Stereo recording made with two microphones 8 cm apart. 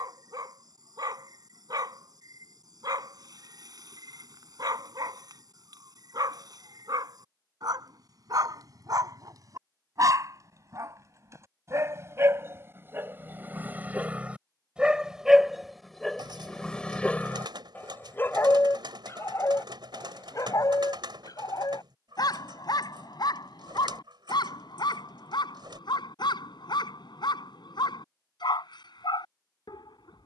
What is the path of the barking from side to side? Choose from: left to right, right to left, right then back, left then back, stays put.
right to left.